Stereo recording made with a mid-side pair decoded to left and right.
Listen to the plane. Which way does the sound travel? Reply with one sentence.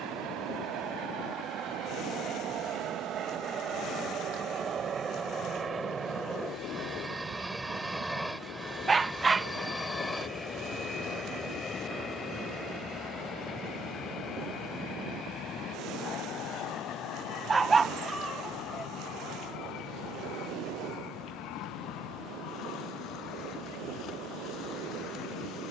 You can hear the plane go from the right side to the left.